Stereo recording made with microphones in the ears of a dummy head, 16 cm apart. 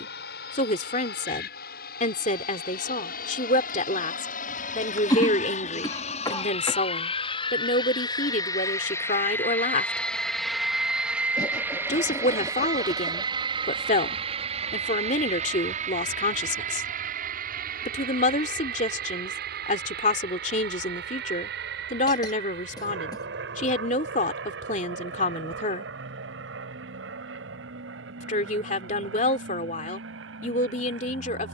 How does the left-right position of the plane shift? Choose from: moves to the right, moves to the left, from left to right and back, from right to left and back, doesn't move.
moves to the right.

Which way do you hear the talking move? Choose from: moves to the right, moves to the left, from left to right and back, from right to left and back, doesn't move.
doesn't move.